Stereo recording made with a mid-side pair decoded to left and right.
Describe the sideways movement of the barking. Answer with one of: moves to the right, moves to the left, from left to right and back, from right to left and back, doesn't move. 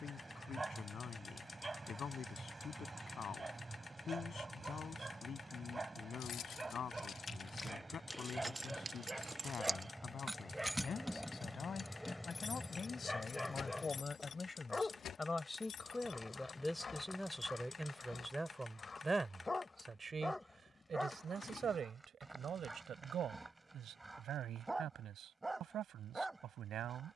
from right to left and back.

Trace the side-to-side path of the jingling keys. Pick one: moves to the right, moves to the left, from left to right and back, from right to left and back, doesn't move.
from left to right and back.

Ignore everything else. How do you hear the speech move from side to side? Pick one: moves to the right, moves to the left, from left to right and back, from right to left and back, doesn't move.
moves to the right.